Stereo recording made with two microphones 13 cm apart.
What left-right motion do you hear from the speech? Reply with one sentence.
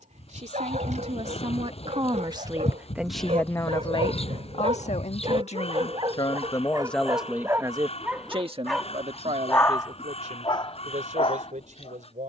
You can hear the speech move from right to left and back again.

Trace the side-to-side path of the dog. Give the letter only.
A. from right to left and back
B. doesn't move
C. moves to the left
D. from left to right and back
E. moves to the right
C.